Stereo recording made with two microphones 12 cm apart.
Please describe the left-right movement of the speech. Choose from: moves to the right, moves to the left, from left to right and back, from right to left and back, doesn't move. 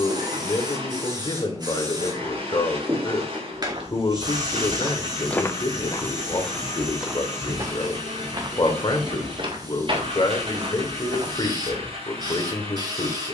doesn't move.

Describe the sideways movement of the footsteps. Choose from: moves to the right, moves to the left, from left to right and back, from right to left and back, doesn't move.
from right to left and back.